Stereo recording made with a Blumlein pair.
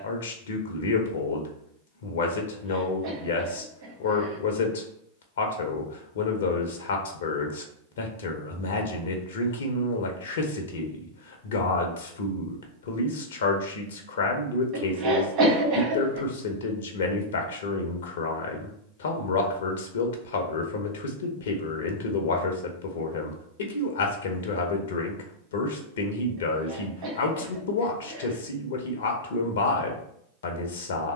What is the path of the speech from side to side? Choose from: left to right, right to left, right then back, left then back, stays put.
stays put.